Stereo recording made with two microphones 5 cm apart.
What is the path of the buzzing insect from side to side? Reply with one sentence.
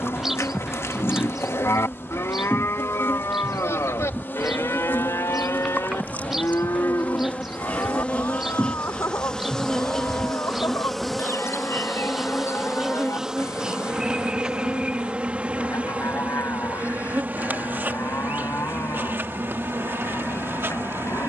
You can hear the buzzing insect travel towards the right.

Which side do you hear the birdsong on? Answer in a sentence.
You can hear the birdsong in the centre.